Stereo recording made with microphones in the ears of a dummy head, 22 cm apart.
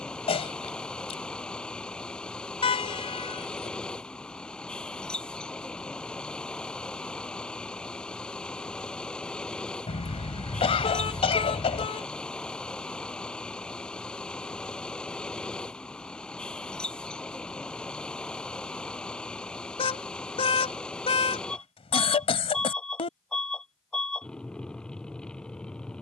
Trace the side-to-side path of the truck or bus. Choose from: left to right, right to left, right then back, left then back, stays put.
stays put.